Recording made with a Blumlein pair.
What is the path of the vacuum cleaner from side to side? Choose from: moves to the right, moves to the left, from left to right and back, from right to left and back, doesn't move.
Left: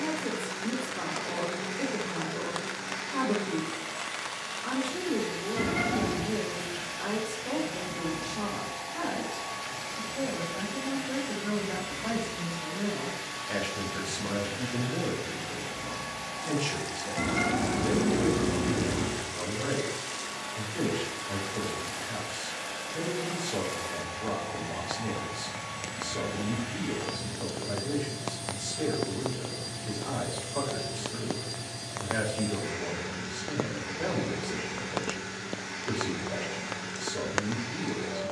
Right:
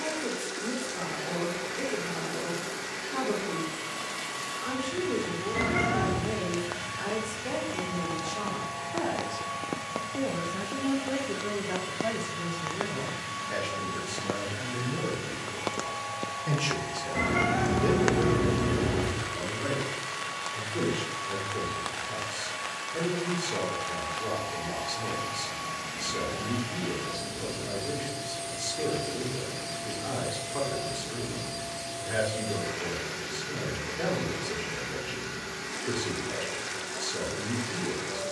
doesn't move.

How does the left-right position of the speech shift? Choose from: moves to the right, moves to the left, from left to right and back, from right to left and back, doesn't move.
from right to left and back.